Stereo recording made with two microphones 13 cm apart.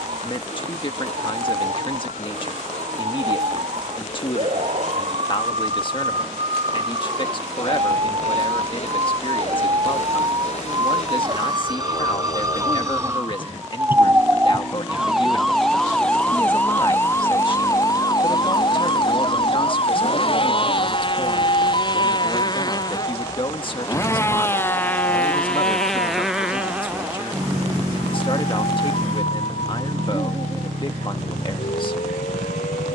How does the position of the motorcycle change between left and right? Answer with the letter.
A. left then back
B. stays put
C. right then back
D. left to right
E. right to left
D.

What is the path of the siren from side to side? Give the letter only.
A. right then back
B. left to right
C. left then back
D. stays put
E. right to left
E.